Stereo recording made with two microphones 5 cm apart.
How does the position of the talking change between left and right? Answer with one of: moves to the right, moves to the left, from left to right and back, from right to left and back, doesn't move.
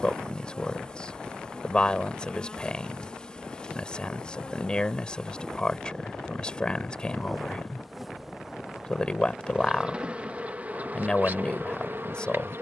doesn't move.